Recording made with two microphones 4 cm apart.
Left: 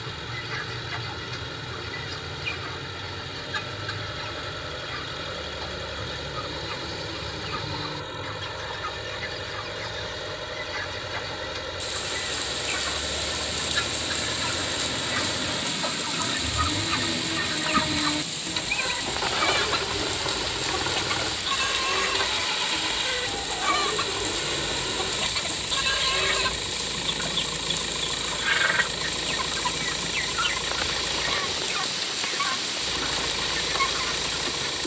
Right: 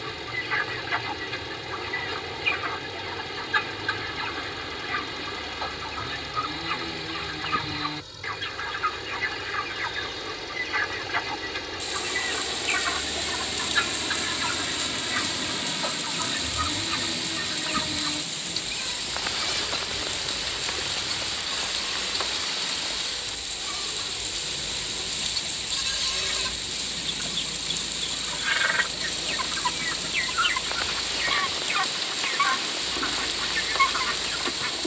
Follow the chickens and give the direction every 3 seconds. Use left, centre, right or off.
right, right, right, right, right, centre, left, left, left, centre, right, right.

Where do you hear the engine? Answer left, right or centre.
left.